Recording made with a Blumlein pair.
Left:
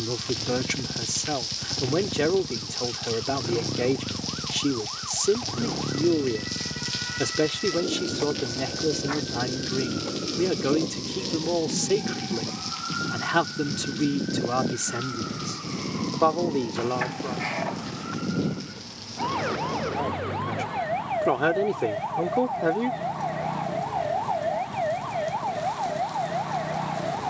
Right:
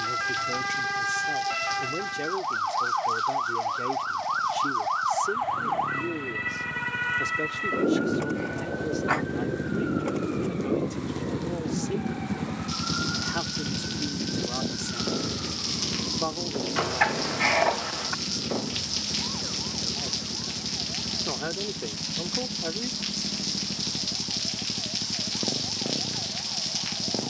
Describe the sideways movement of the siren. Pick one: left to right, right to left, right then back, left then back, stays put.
right to left.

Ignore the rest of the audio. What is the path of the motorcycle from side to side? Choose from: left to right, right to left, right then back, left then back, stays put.
left to right.